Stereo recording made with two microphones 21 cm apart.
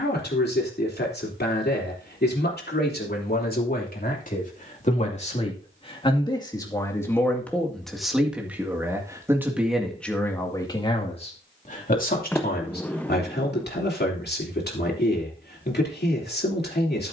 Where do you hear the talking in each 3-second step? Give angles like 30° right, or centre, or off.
50° left, 40° left, 10° left, 10° left, 50° left, 50° left.